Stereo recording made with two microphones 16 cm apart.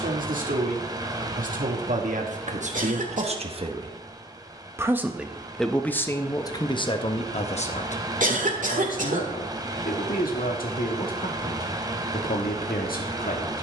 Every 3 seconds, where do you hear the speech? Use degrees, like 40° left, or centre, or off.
60° right, 20° right, 40° left, 60° left, 60° left.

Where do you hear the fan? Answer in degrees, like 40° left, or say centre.
20° right.